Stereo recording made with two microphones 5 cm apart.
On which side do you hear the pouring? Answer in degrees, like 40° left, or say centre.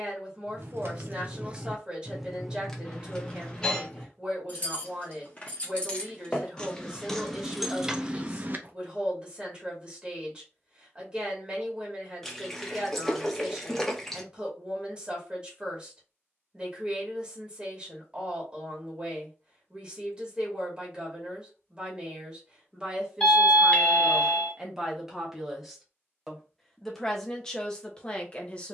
centre.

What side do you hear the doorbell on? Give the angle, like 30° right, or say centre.
20° left.